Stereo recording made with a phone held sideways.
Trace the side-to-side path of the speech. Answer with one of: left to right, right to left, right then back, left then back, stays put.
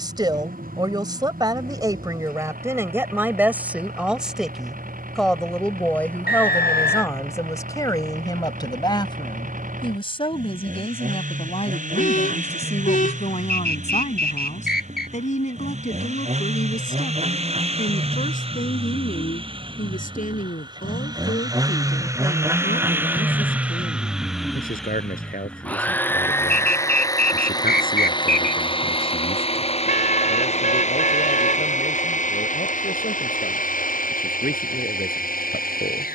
right to left.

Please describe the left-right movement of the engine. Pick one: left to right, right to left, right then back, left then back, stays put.
right to left.